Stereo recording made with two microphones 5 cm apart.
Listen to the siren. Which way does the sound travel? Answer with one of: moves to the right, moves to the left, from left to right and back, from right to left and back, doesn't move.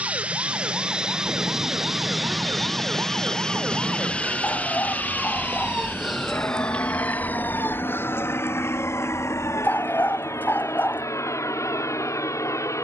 moves to the left.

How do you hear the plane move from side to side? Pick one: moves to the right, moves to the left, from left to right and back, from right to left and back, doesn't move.
moves to the left.